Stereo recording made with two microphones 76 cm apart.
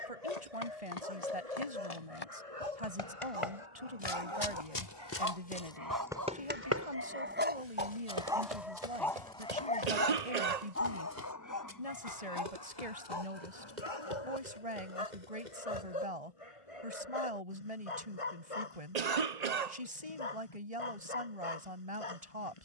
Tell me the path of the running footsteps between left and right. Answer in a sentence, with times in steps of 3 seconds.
In this clip you hear the running footsteps on the left from 0 s, on the right from 6 s and not at all from 18 s.